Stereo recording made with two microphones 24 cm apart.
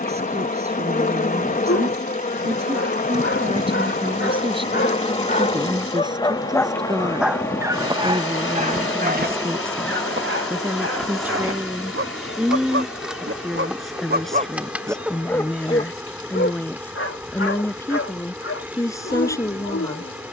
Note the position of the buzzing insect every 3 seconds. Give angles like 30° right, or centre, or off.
30° left, 30° left, 10° left, centre, centre, 10° right, 10° right.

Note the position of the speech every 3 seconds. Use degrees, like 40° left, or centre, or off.
20° right, 20° right, 10° right, 10° right, centre, 10° left, 10° left.